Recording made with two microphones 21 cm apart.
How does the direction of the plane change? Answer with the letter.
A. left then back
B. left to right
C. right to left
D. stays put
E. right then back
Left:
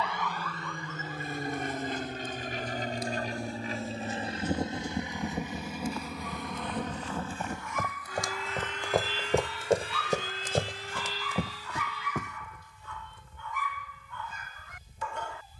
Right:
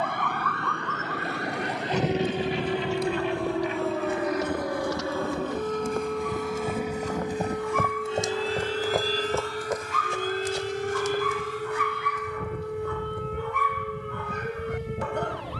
B.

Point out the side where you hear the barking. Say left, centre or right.
right.